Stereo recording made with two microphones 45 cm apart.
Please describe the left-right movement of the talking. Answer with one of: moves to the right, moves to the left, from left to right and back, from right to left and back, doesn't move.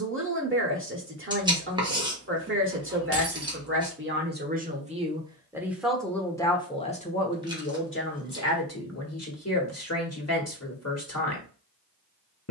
moves to the left.